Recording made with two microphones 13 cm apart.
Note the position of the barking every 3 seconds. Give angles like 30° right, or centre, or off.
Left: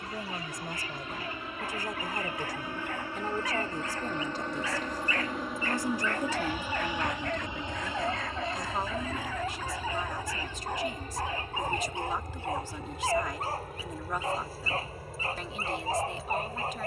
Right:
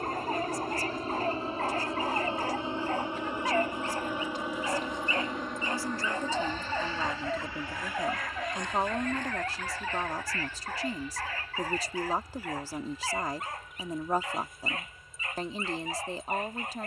40° right, 30° right, 10° right, 20° left, 30° left, 30° left.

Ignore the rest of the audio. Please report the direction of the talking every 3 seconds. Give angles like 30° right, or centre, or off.
60° left, 40° left, 10° right, 40° right, 40° right, 40° right.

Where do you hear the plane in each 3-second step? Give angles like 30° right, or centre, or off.
30° right, 10° right, 20° left, 40° left, 50° left, 60° left.